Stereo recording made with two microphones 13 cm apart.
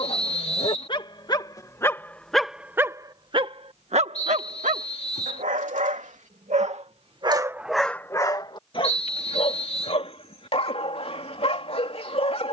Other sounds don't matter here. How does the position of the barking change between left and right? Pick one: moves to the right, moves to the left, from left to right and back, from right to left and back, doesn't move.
from left to right and back.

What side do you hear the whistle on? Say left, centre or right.
left.